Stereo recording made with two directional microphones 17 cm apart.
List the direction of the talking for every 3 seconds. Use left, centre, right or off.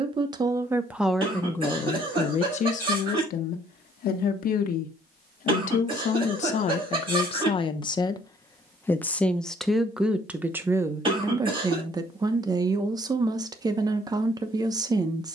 centre, left, left, centre, right.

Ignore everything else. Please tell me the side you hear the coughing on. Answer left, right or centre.
right.